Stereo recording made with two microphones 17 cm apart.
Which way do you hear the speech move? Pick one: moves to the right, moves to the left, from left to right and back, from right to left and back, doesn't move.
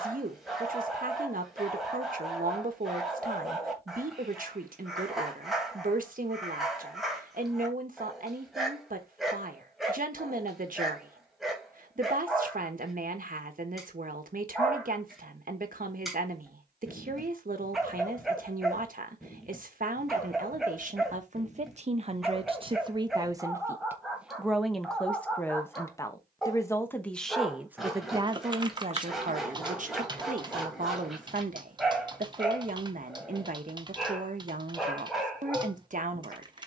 from right to left and back.